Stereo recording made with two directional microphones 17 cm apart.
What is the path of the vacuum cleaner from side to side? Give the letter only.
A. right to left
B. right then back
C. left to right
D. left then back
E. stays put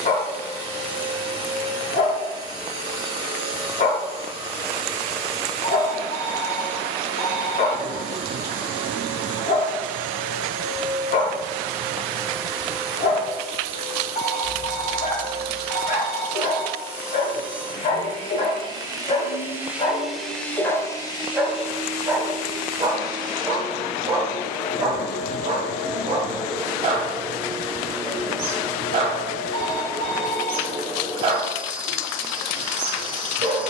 D.